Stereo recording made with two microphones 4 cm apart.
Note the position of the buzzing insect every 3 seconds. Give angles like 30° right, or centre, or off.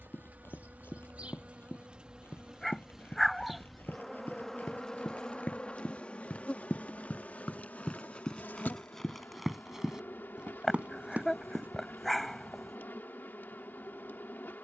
30° right, 10° left, 40° left, 50° left, 50° left.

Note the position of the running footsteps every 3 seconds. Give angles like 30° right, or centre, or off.
60° left, 50° left, 30° left, 20° right, off.